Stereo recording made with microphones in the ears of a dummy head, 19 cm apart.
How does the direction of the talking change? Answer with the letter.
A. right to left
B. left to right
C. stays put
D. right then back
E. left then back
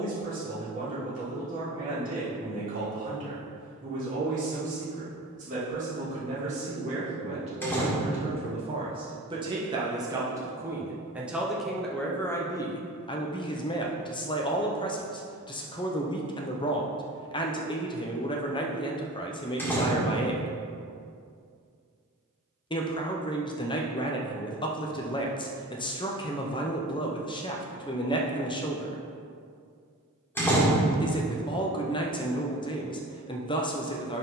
A.